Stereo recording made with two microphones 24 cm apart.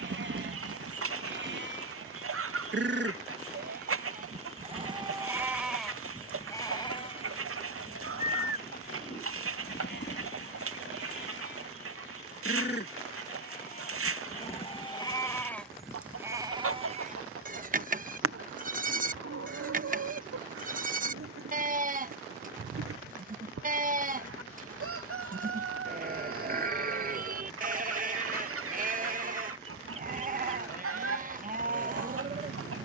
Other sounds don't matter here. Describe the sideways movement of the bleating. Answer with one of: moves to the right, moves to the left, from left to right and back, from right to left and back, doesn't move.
from right to left and back.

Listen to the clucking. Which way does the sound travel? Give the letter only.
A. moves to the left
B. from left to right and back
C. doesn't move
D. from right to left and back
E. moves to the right
C.